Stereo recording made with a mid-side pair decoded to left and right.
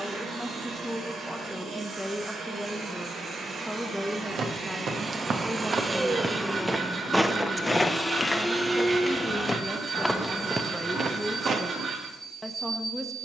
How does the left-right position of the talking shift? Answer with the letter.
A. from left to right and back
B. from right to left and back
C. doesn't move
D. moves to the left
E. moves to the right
C.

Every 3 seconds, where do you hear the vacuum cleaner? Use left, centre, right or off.
right, right, centre, right, right.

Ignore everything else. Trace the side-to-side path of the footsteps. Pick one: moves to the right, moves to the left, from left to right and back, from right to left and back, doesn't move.
from right to left and back.